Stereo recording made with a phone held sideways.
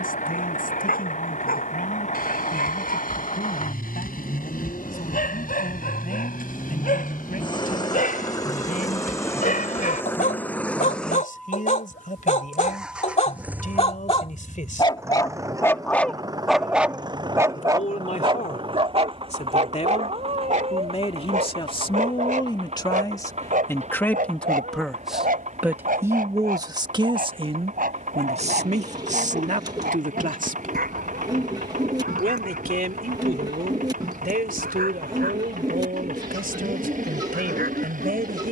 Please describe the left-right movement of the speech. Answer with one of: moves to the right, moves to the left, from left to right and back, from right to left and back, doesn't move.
moves to the right.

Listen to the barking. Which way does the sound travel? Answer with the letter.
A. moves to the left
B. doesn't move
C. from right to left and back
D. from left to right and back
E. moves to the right
E.